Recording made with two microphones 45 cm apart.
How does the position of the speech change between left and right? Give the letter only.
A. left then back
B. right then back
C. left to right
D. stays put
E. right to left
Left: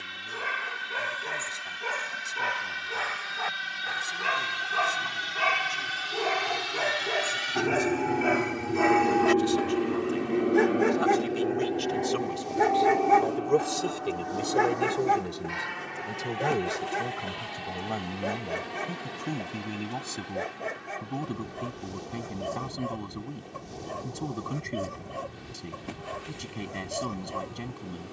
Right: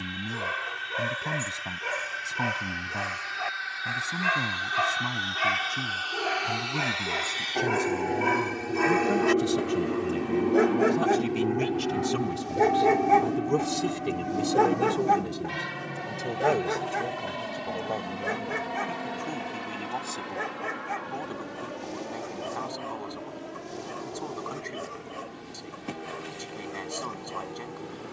E.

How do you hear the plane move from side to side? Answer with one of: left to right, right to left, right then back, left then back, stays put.
left to right.